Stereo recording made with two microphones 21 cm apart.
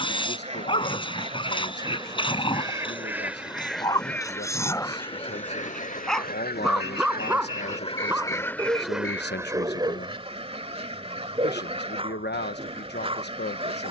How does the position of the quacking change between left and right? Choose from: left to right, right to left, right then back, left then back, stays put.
left then back.